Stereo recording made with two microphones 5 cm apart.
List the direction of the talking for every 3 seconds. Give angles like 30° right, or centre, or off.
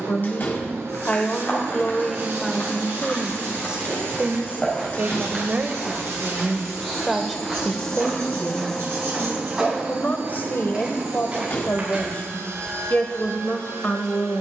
20° left, 30° right, 10° left, 40° left, 40° left.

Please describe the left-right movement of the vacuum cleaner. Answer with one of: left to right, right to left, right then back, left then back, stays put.
left then back.